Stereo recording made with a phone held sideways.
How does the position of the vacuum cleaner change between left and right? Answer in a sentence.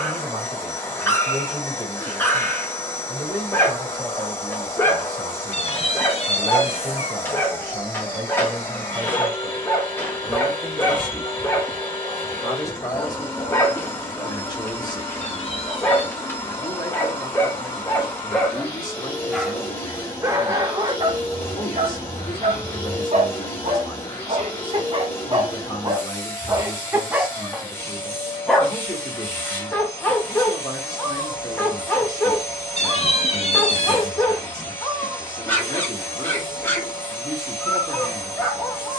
You can hear the vacuum cleaner stay put.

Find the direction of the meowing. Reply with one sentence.
In this clip you hear the meowing on the left.